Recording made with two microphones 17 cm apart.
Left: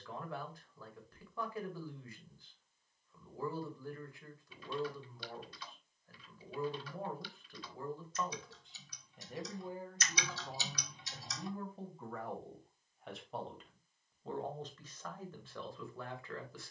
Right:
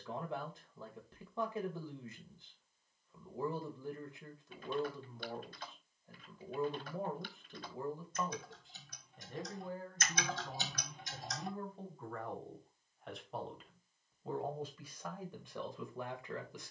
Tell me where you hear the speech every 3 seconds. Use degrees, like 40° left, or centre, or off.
20° right, 20° right, 20° right, 10° left, centre, 20° right.